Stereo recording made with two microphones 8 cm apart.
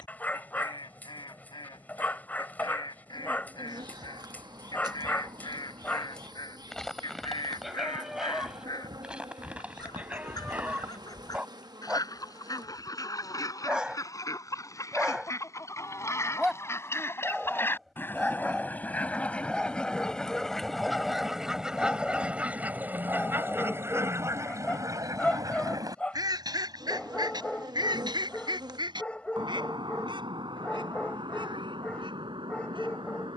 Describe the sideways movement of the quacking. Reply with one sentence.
In this clip you hear the quacking move to the right.